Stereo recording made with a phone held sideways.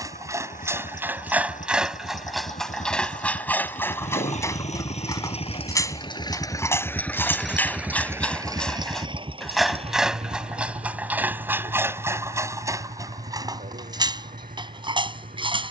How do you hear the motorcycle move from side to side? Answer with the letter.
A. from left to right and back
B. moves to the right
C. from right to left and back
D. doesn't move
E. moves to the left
B.